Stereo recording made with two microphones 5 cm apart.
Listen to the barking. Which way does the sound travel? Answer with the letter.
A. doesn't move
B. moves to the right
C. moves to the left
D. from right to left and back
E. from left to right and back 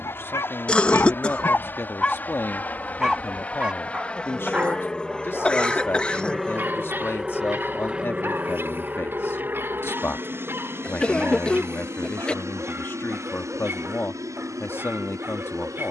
B.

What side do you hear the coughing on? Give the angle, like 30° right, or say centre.
20° left.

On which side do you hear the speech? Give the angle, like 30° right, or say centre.
40° left.